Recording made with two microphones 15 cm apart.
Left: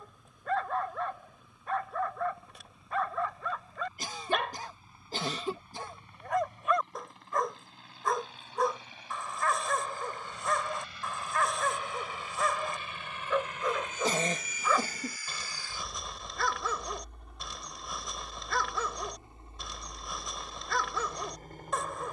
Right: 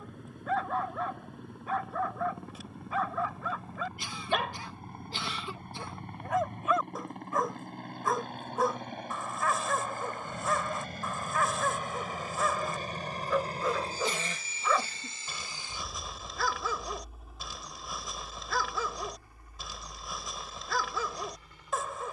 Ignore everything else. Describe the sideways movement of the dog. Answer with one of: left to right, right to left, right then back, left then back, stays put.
stays put.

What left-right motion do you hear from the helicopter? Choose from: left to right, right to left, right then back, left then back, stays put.
right to left.